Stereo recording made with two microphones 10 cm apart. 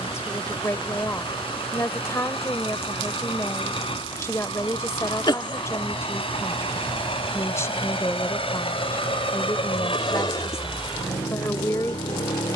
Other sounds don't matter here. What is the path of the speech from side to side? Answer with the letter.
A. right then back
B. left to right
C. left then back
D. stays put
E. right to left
D.